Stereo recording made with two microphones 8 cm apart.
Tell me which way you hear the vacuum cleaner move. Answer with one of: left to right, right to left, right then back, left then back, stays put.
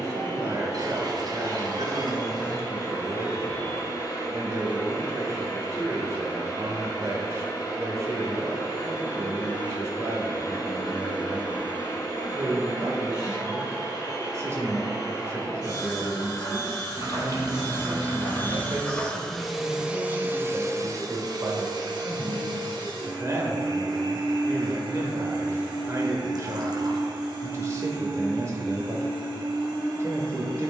left to right.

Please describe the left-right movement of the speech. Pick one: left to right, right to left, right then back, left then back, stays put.
stays put.